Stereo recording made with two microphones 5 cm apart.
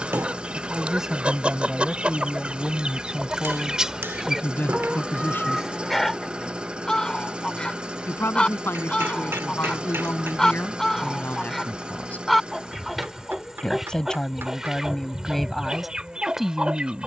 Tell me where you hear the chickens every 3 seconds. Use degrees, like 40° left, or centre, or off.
30° right, 10° right, 20° left, 10° left, 10° right, 20° right.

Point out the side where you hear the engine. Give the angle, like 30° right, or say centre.
20° right.